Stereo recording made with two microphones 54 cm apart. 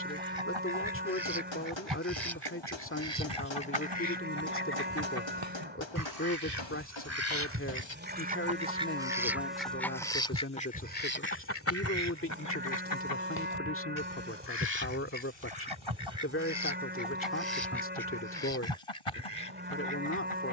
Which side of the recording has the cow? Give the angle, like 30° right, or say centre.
20° right.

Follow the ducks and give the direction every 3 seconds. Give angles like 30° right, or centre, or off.
60° right, 50° right, 20° right, 10° left, 40° left, 60° left, 70° left.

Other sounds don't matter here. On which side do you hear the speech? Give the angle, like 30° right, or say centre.
20° left.